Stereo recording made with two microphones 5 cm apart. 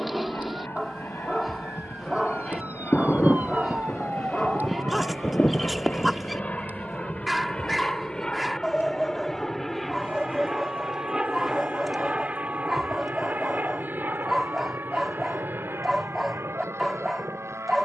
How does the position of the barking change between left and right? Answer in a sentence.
In this clip you hear the barking stay put.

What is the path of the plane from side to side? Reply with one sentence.
You can hear the plane travel towards the right.